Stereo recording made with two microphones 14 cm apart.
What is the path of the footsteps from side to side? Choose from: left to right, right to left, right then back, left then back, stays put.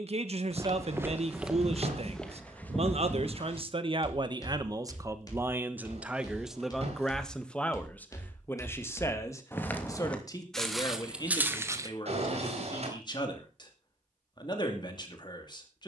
left then back.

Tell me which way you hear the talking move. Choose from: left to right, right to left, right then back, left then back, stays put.
right to left.